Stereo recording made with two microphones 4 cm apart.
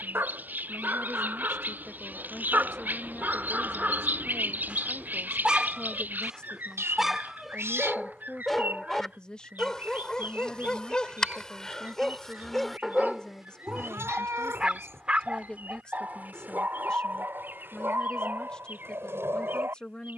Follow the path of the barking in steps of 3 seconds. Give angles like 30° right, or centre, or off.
50° right, 30° right, centre, 10° left, 10° right, 40° right, 60° right.